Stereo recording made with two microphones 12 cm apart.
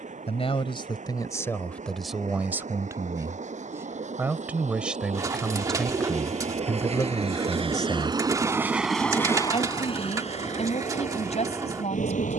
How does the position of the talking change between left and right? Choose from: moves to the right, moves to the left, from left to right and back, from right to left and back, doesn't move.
from left to right and back.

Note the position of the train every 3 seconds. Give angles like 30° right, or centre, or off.
80° right, 70° right, 40° right, 50° left.